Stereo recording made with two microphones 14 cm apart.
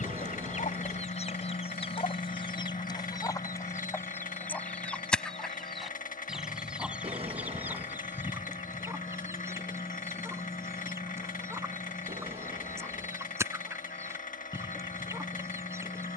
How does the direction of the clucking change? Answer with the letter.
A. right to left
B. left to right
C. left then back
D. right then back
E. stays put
B.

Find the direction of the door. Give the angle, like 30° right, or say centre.
40° right.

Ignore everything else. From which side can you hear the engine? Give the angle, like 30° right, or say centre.
80° left.